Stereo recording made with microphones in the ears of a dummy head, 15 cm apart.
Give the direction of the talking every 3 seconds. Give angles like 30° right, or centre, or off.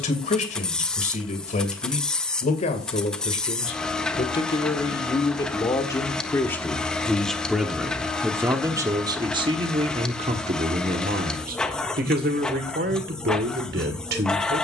40° left, 30° left, centre, 40° right, 60° right.